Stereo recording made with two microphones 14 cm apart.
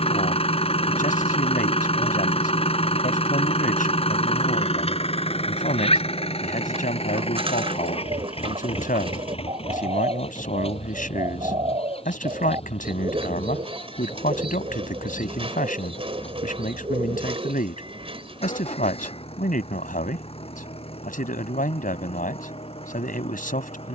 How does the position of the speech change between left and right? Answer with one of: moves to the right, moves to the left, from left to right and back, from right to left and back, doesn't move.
doesn't move.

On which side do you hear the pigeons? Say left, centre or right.
right.